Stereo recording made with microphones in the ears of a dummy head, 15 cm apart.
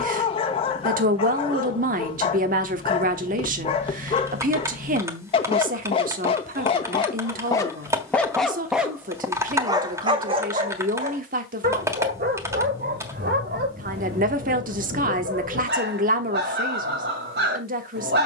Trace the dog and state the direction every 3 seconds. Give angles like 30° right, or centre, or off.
30° left, 30° left, 20° left, 30° right, 60° right, 60° right.